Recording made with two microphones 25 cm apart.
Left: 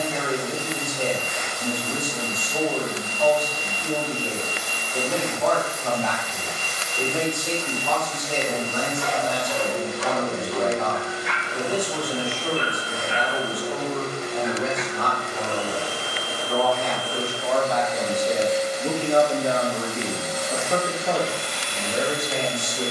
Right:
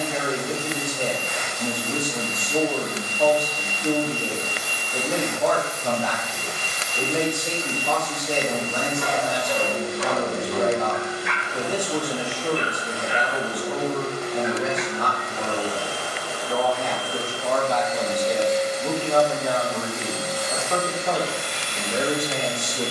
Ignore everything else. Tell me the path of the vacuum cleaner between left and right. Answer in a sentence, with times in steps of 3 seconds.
In this clip you hear the vacuum cleaner on the left from 0 s, in the centre from 18 s and on the right from 21 s.